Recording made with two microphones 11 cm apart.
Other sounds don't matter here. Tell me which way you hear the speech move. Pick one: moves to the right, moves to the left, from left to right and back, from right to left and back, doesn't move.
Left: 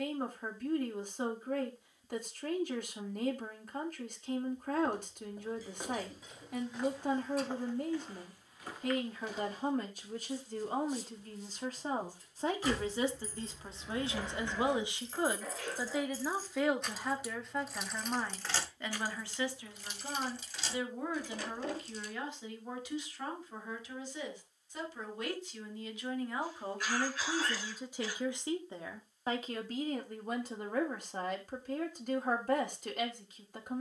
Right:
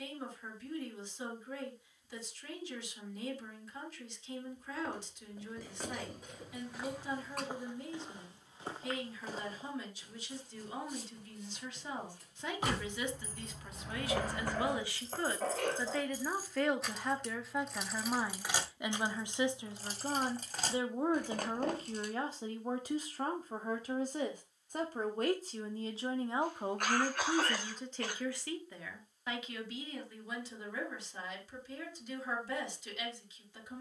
from left to right and back.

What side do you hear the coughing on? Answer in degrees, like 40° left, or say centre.
60° right.